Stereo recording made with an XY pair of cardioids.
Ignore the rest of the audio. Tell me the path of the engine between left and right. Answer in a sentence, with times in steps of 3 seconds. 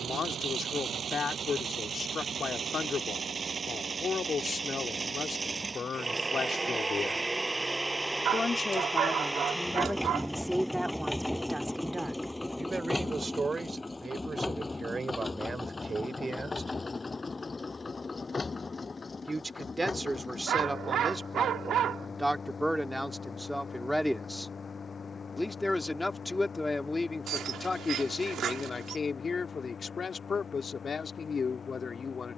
You can hear the engine on the right from 0 s, in the centre from 6 s and on the left from 12 s.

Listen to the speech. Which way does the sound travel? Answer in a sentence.
You can hear the speech move from left to right and back again.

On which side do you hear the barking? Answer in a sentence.
In this clip you hear the barking on the right.